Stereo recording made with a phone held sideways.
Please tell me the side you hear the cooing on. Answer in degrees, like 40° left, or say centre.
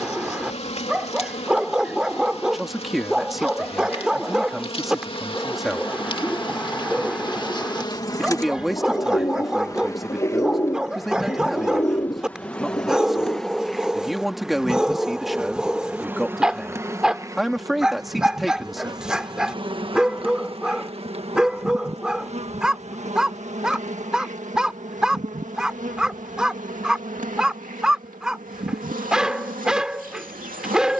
20° left.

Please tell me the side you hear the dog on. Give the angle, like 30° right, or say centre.
10° right.